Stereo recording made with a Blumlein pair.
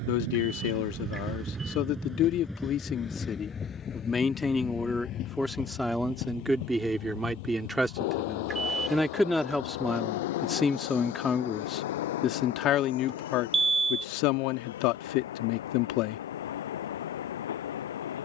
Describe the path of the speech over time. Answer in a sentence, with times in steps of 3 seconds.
You can hear the speech on the left from 0 s, in the centre from 3 s and on the left from 12 s.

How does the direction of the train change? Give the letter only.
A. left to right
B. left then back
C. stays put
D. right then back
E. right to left
E.